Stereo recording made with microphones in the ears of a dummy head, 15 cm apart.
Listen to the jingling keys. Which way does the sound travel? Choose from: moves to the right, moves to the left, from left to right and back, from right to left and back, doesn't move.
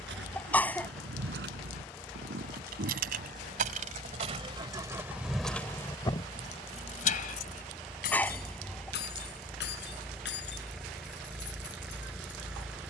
moves to the left.